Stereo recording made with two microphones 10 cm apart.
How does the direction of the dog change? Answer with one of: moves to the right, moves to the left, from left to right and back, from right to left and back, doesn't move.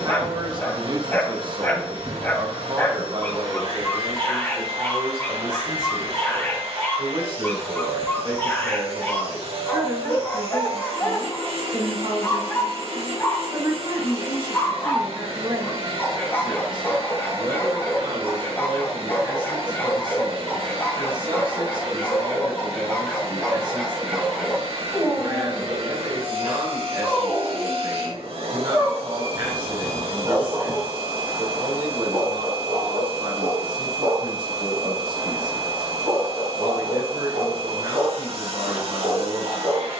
moves to the right.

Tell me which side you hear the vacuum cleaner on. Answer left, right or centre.
right.